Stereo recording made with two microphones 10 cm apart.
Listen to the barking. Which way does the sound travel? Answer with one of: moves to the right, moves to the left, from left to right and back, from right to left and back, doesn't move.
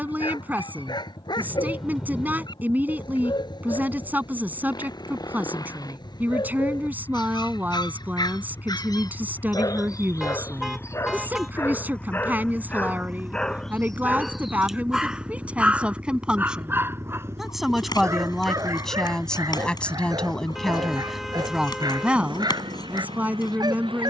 moves to the right.